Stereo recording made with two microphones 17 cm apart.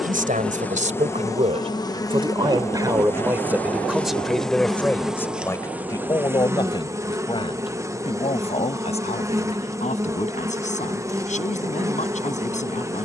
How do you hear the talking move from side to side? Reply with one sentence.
In this clip you hear the talking move from right to left.